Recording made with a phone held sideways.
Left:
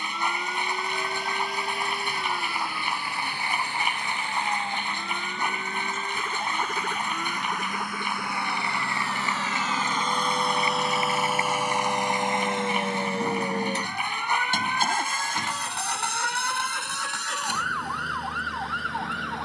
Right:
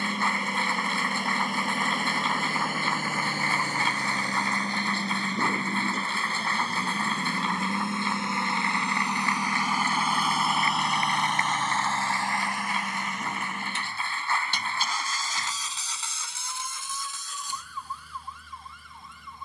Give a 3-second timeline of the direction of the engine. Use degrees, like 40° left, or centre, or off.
50° right, 40° right, 30° right, centre, 30° left, 70° left, 80° left.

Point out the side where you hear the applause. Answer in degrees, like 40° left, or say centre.
20° left.